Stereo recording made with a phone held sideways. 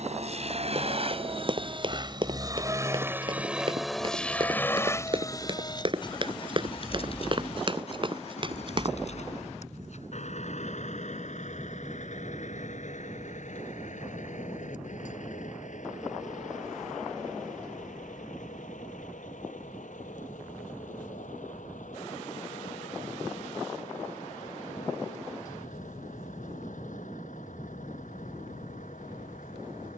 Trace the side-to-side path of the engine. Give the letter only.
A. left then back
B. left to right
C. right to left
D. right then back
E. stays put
C.